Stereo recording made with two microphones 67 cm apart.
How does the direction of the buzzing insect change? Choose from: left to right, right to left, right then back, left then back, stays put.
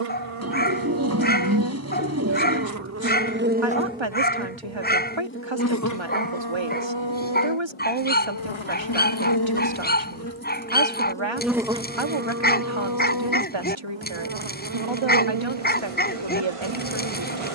left then back.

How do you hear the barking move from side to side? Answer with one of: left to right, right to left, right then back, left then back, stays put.
stays put.